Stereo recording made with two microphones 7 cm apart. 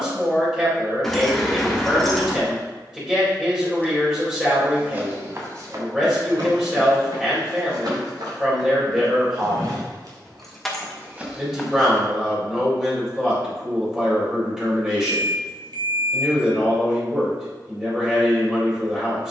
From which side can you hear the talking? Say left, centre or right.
centre.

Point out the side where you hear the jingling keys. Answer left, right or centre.
centre.